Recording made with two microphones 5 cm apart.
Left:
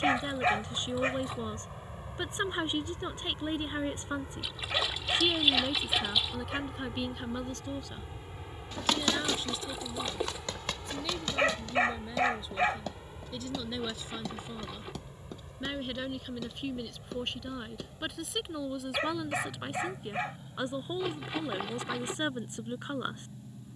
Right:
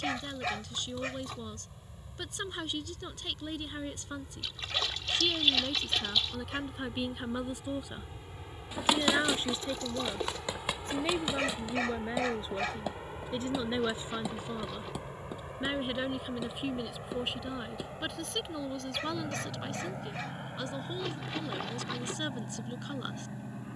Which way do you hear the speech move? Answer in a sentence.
You can hear the speech go right and come back.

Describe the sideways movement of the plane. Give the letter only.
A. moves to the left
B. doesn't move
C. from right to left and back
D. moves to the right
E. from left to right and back
D.